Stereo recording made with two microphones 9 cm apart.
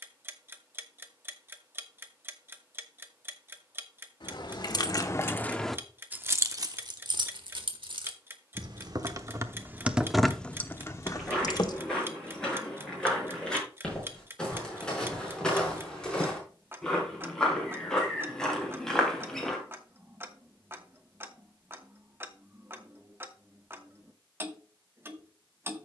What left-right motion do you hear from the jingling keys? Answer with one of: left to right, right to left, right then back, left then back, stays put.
right then back.